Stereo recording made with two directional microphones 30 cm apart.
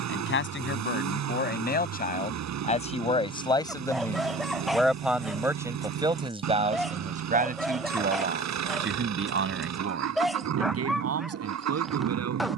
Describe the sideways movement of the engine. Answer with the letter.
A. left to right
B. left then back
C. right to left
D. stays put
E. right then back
D.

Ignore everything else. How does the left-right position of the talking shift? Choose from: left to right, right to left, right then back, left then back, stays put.
left to right.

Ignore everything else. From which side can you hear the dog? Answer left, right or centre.
centre.